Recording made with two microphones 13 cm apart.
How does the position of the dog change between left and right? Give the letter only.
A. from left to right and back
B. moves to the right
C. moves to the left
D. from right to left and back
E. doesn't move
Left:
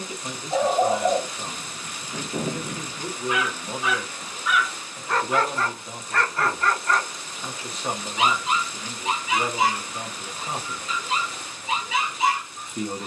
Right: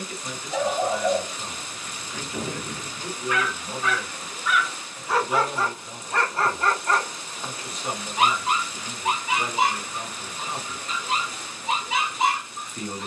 B.